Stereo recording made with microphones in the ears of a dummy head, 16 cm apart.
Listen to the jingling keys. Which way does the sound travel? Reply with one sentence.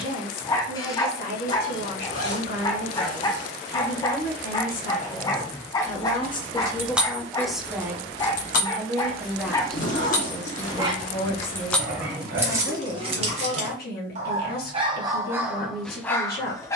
You can hear the jingling keys go left and come back.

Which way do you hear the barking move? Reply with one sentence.
In this clip you hear the barking move from left to right and back again.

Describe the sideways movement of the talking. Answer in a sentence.
In this clip you hear the talking go right and come back.